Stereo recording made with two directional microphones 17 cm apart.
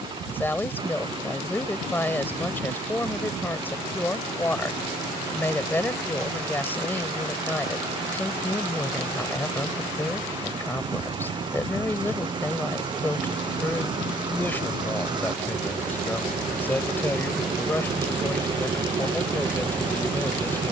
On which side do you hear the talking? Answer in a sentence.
You can hear the talking in the centre.